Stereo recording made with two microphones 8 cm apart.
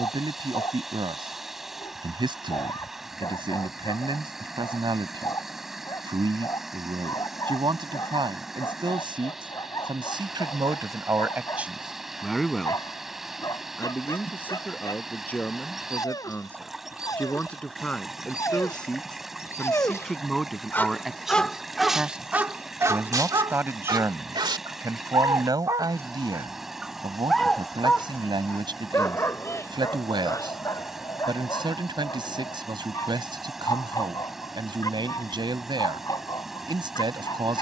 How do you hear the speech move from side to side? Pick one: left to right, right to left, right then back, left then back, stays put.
left then back.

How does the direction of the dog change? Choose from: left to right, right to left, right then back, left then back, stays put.
right then back.